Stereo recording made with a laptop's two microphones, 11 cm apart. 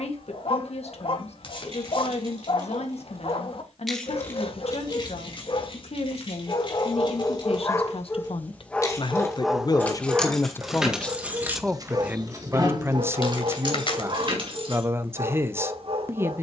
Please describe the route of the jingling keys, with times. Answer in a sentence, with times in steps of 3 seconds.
You can hear the jingling keys on the right from 0 s, on the left from 3 s, in the centre from 9 s, on the right from 12 s and not at all from 15 s.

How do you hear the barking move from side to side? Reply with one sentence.
In this clip you hear the barking travel towards the right.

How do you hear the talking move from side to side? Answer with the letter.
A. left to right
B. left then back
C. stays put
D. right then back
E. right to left
A.